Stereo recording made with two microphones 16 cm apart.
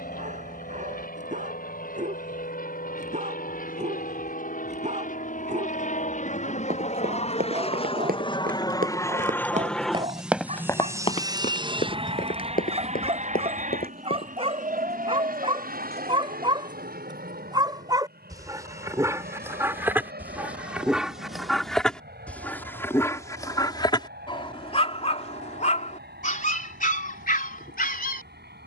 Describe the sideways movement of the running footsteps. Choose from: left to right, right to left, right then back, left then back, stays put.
right to left.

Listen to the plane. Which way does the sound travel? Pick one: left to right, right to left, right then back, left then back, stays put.
left to right.